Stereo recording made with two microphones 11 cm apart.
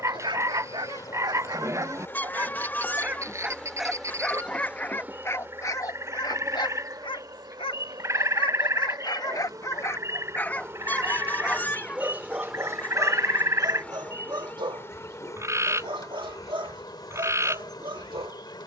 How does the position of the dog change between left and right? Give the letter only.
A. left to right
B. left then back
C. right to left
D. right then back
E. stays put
B.